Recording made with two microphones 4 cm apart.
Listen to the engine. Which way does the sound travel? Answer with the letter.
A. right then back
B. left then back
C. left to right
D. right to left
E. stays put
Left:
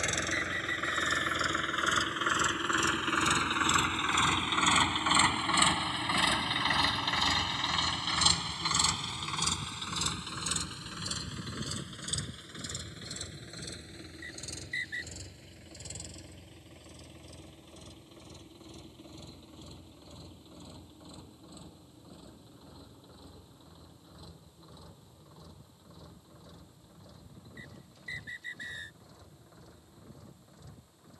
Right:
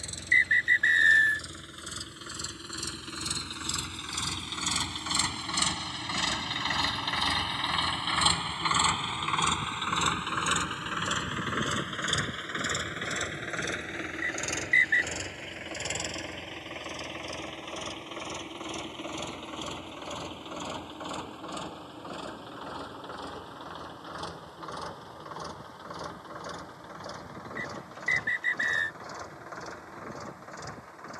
C.